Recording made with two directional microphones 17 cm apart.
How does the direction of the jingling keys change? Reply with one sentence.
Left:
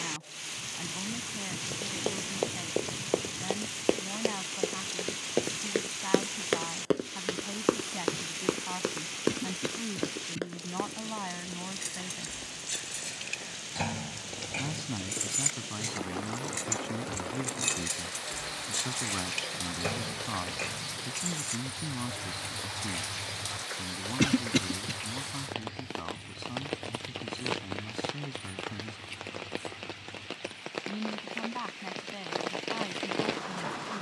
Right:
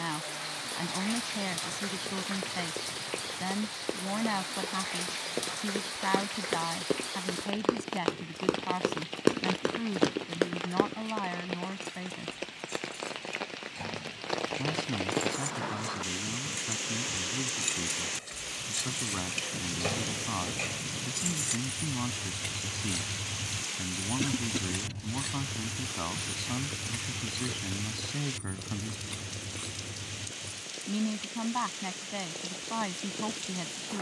In this clip you hear the jingling keys go from the left side to the right.